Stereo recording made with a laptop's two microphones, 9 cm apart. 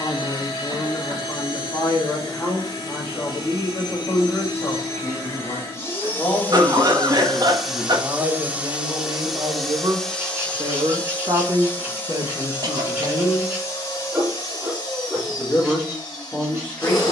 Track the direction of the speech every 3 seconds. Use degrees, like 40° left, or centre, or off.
20° left, 20° left, 10° right, 50° right, 30° right, 10° left.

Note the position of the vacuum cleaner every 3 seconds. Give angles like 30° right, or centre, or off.
40° left, 40° left, centre, 10° left, 30° left, 40° left.